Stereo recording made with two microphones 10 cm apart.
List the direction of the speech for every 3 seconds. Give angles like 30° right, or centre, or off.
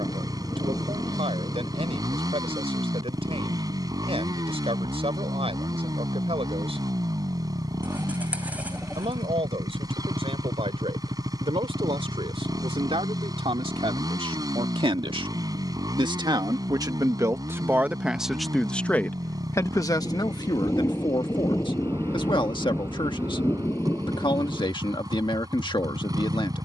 80° right, 80° right, 80° right, 80° right, 70° right, 40° right, 20° left, 50° left, 50° left.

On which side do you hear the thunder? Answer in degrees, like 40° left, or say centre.
30° left.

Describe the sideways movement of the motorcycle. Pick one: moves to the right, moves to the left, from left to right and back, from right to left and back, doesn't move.
doesn't move.